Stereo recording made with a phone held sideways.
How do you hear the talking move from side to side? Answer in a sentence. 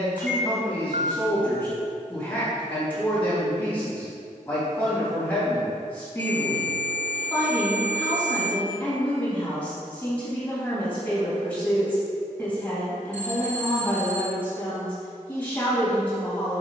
In this clip you hear the talking stay put.